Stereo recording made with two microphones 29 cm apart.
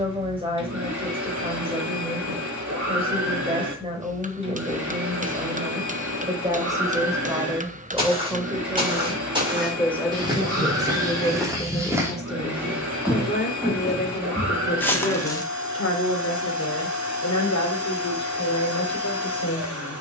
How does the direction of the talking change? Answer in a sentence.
You can hear the talking move to the left.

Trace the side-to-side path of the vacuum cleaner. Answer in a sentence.
You can hear the vacuum cleaner stay in one place.